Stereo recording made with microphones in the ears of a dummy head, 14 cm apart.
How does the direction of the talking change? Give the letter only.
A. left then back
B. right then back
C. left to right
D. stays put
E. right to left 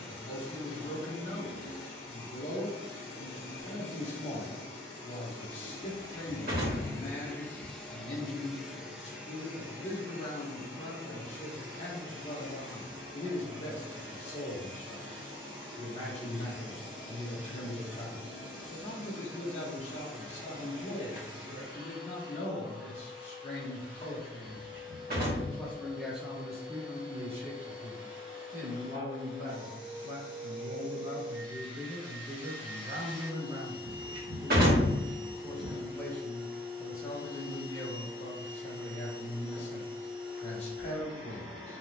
B.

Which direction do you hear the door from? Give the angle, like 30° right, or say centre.
60° right.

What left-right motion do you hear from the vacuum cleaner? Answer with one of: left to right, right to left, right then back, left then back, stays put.
left to right.